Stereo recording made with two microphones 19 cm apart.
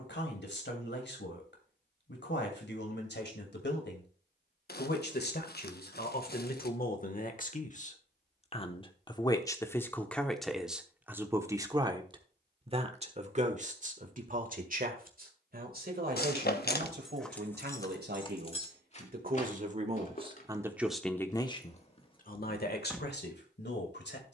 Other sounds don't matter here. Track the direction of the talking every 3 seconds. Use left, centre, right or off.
left, left, left, centre, right, right, right, left.